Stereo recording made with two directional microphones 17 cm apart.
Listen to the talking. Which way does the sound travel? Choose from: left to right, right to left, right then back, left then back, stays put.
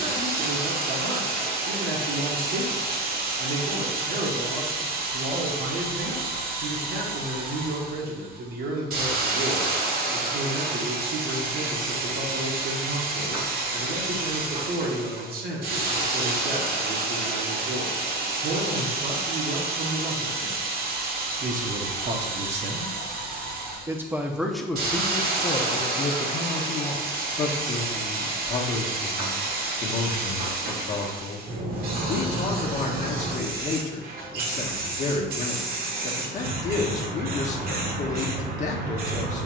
right to left.